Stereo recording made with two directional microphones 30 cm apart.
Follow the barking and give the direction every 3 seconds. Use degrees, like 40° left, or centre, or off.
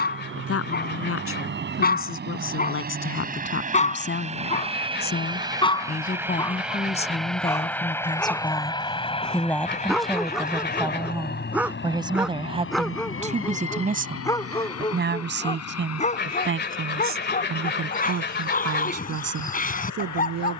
30° left, 20° left, 10° left, centre, 10° left, 20° left, 30° left.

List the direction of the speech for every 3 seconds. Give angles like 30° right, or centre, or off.
40° left, 30° left, 20° left, centre, 20° right, 40° right, 50° right.